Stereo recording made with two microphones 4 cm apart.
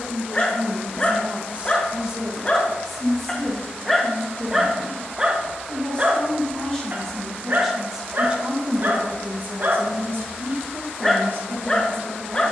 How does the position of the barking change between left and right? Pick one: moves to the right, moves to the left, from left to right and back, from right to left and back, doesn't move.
from left to right and back.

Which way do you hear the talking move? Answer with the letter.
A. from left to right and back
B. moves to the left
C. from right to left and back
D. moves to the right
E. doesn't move
C.